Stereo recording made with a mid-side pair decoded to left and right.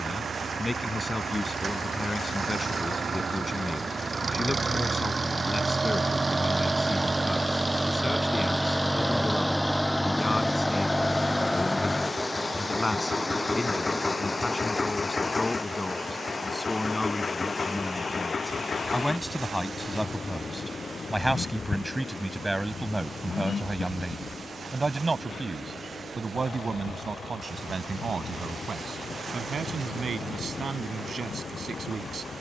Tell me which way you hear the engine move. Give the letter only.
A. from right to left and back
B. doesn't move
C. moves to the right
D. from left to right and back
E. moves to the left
E.